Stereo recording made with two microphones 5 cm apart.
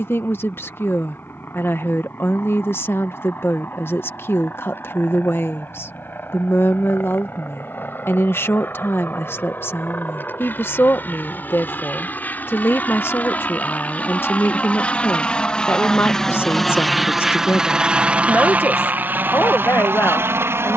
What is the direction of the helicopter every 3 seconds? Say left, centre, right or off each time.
left, left, left, left, left, centre, right.